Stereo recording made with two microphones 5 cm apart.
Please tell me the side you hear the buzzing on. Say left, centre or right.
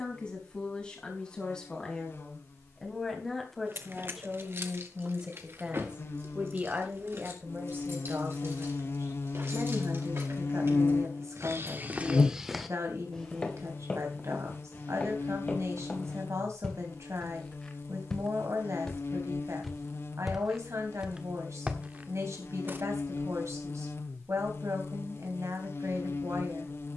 left.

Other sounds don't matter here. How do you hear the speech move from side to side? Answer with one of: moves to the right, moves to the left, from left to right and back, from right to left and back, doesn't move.
moves to the right.